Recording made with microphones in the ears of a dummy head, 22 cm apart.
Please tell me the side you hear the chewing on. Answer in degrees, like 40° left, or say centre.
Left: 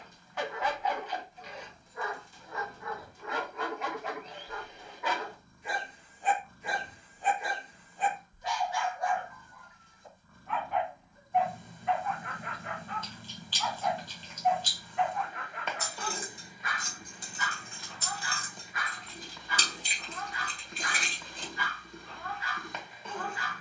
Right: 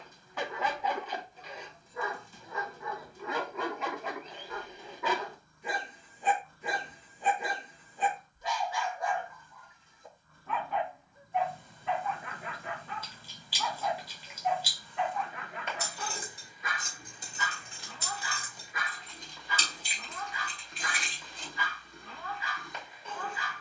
10° right.